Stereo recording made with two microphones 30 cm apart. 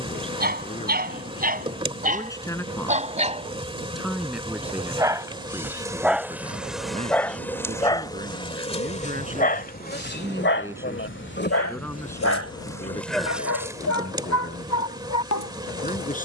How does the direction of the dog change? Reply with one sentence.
You can hear the dog travel towards the left.